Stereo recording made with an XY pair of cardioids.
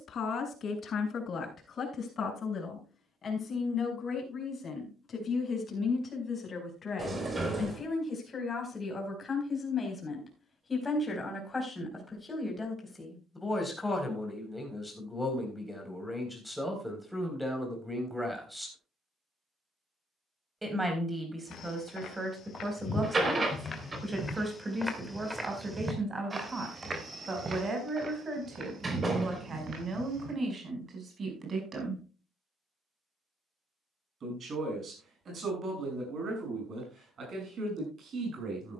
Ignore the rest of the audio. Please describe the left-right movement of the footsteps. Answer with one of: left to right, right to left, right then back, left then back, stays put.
left to right.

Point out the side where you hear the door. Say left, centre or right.
right.